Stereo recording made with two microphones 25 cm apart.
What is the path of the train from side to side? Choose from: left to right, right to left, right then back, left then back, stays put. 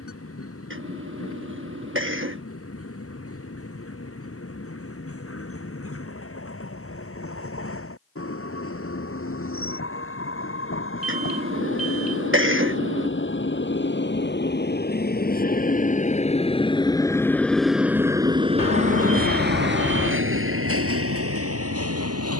left to right.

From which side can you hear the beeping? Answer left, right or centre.
left.